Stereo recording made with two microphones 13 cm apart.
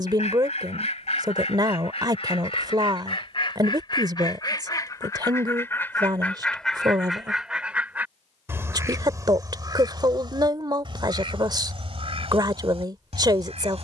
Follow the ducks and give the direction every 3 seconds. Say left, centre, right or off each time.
left, left, centre, right, right.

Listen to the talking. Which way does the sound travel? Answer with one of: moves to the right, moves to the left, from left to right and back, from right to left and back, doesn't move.
doesn't move.